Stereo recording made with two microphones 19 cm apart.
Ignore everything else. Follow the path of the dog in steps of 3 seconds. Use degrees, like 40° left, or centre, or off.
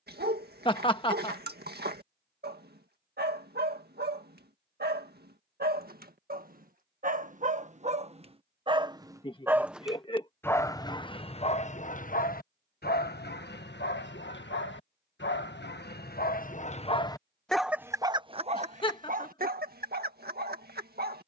60° right, 50° right, 40° right, 20° left, 60° left, 40° left, 40° right.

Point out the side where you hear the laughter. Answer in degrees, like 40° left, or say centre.
30° left.